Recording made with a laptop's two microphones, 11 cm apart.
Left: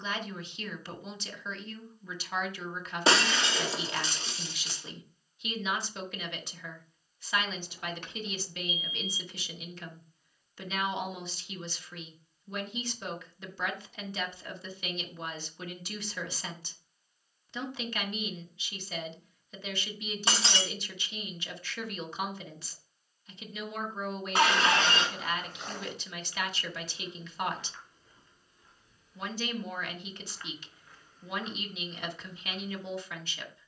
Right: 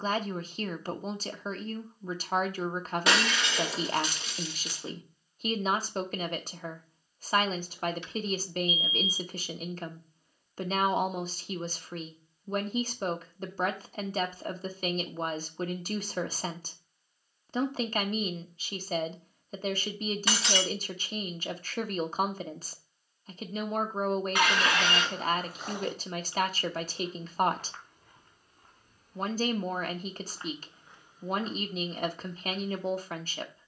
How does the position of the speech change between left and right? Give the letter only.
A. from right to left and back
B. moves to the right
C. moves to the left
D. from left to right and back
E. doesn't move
E.